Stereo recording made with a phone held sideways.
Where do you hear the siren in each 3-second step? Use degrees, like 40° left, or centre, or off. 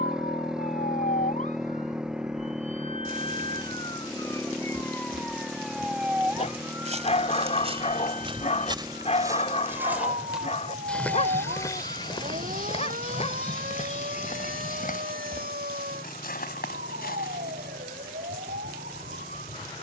50° left, 20° left, 20° right, 50° right, 60° right, 70° right, 70° right.